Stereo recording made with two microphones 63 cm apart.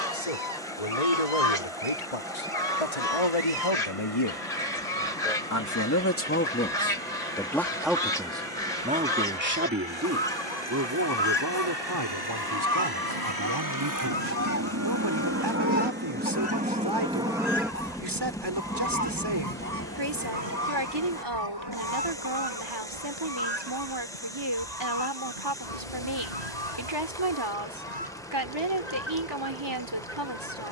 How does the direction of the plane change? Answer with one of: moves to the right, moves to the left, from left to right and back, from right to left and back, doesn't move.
moves to the left.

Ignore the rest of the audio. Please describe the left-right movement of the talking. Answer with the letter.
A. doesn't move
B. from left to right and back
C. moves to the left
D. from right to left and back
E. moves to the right
E.